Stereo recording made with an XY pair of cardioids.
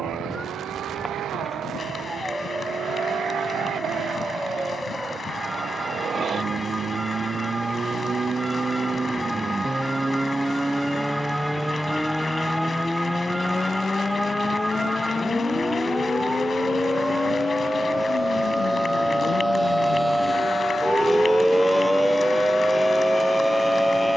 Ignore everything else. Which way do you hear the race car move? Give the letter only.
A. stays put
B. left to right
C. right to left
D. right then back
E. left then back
C.